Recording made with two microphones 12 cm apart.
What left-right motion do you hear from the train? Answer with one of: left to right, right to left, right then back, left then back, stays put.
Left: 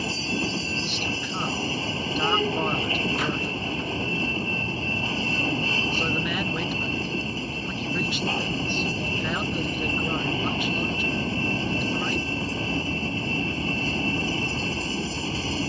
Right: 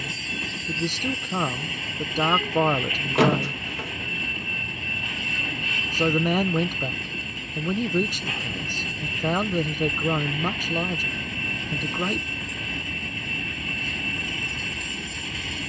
stays put.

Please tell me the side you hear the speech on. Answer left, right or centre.
right.